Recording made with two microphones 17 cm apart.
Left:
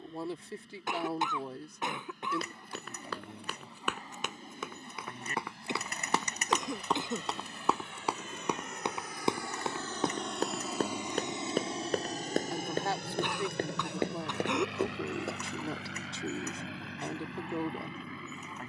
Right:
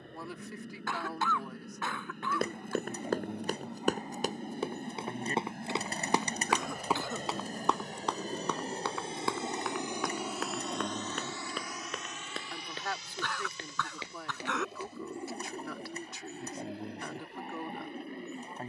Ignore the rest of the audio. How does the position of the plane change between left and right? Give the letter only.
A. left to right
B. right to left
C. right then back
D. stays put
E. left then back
B.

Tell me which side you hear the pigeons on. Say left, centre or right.
right.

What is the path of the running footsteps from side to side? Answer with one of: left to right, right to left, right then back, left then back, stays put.
right to left.